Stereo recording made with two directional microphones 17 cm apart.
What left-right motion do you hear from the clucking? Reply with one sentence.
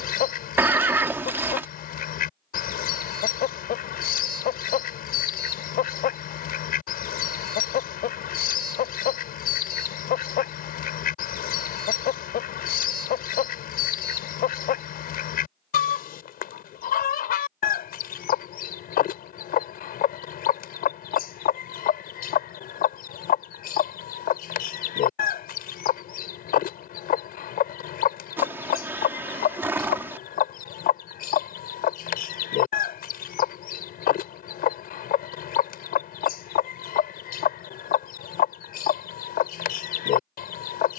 In this clip you hear the clucking stay put.